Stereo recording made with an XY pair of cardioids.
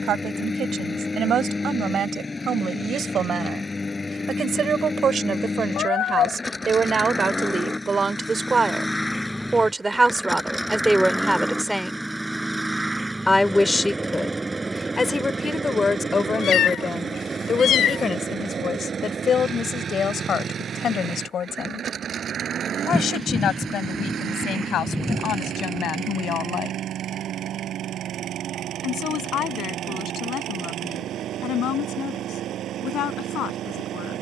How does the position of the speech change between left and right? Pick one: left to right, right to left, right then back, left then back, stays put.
right to left.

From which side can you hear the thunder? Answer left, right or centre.
centre.